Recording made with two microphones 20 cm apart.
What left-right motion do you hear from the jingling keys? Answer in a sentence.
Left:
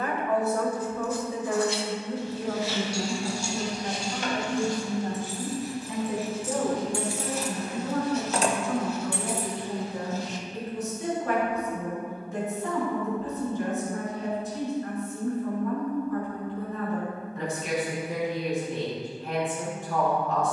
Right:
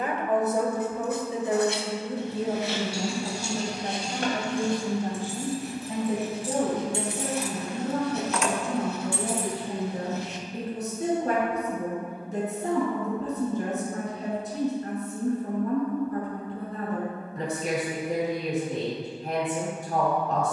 You can hear the jingling keys travel towards the left.